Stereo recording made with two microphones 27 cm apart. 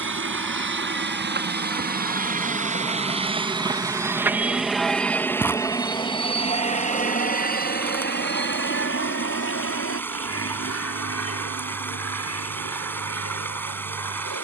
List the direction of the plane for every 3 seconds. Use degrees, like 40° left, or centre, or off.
40° right, centre, 30° left, 50° left, 60° left.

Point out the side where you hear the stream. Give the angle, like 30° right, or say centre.
10° left.